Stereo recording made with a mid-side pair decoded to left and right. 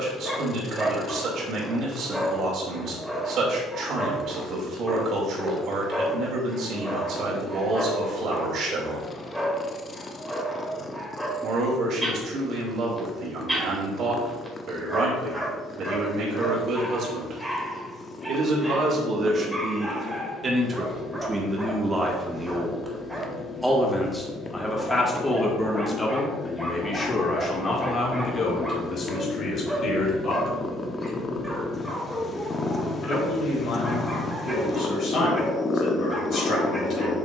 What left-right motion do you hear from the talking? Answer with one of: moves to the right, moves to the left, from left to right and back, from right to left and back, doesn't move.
moves to the left.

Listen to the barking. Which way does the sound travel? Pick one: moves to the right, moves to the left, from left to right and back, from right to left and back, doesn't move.
doesn't move.